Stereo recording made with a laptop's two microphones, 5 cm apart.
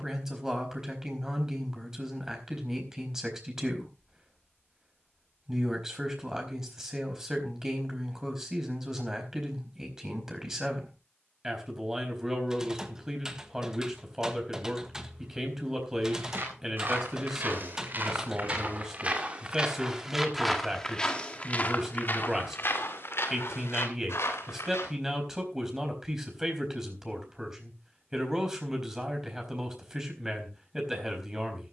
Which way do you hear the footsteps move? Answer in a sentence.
You can hear the footsteps travel towards the left.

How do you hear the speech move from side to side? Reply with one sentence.
In this clip you hear the speech stay in one place.